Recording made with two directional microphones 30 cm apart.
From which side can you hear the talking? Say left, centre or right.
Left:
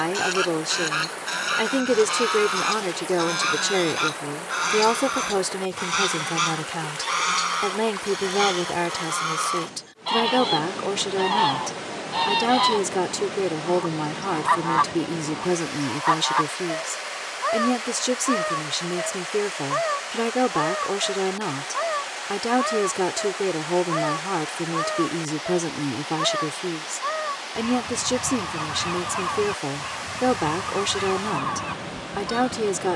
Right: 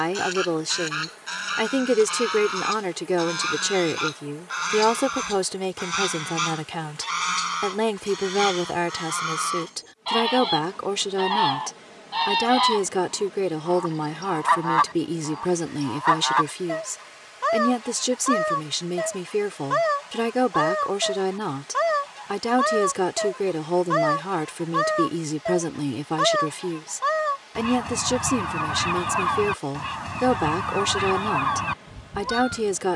centre.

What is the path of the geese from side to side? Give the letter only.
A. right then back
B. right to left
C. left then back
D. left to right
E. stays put
D.